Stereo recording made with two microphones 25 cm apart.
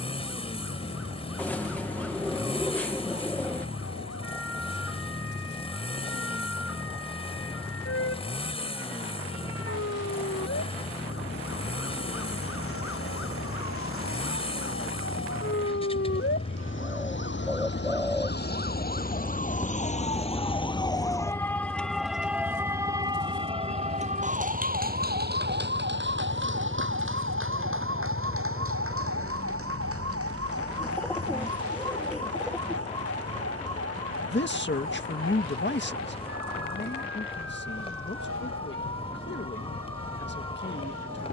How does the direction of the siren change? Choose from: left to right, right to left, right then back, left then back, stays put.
left to right.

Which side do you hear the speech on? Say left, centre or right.
left.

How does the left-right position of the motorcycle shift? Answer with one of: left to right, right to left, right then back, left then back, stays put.
stays put.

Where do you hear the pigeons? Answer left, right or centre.
centre.